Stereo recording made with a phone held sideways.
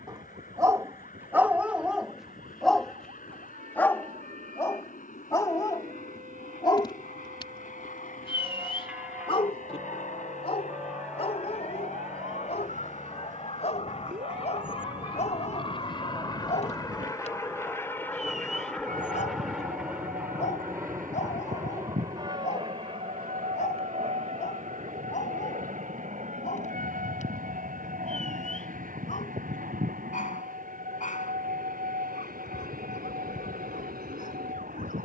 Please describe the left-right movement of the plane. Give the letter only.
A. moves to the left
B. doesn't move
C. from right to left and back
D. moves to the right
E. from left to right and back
D.